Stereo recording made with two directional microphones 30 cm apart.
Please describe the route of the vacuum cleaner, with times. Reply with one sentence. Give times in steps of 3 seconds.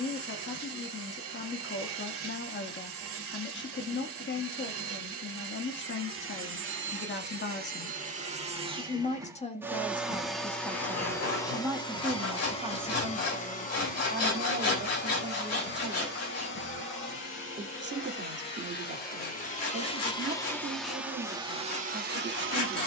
You can hear the vacuum cleaner on the right from 0 s, in the centre from 9 s, on the left from 12 s and on the right from 21 s.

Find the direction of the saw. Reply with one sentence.
In this clip you hear the saw on the left.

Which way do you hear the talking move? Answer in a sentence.
In this clip you hear the talking move to the right.